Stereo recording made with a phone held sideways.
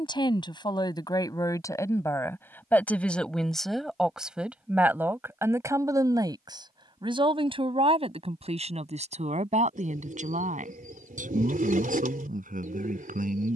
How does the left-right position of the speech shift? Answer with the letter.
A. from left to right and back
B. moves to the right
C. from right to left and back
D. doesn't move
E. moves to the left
B.